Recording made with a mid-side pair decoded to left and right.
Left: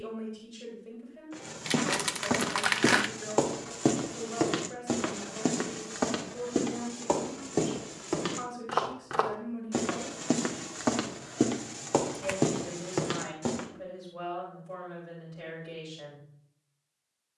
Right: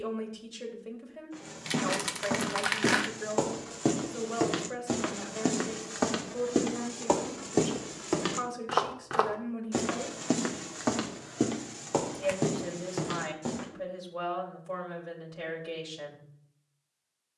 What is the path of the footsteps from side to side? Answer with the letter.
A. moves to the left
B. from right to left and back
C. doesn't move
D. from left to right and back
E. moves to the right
D.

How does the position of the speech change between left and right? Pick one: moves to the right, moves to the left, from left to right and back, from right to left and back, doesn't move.
doesn't move.